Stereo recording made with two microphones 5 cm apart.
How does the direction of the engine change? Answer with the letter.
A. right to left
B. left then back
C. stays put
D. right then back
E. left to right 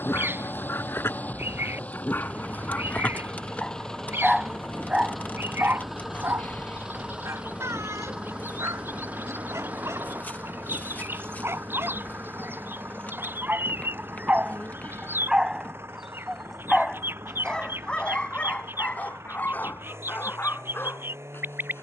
E.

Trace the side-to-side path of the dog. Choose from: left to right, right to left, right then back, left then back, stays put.
right then back.